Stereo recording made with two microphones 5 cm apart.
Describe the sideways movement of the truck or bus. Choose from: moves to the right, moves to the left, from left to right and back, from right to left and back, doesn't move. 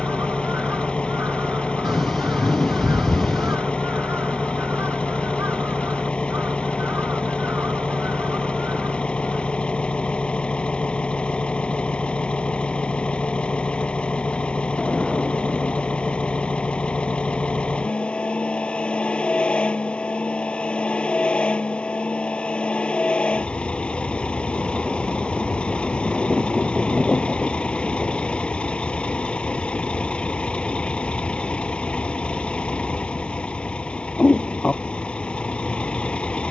doesn't move.